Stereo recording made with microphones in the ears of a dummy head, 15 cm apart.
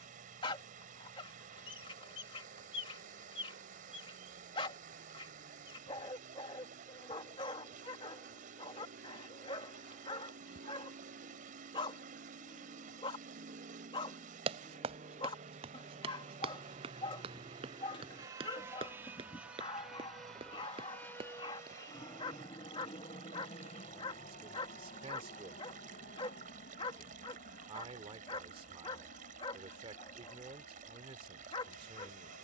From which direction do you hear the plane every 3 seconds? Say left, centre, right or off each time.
right, right, right, right, right, right, centre, left, left, left, left.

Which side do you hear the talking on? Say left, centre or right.
right.